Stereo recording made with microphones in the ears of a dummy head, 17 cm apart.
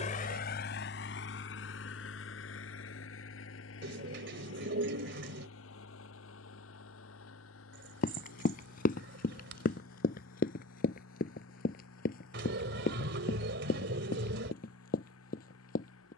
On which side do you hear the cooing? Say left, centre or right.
right.